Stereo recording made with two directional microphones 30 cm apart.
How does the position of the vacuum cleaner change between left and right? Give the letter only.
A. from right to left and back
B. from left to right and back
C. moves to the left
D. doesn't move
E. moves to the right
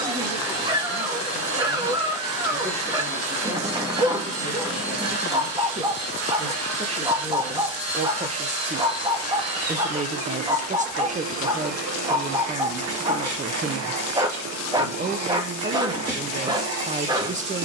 D.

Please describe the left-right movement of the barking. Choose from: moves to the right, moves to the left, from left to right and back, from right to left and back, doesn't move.
doesn't move.